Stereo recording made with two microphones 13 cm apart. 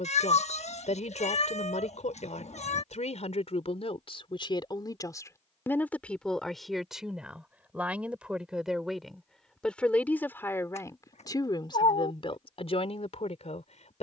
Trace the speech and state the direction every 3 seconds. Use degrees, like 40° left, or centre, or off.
70° left, 40° left, centre, 20° left, 60° left.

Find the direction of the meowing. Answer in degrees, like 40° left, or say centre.
60° left.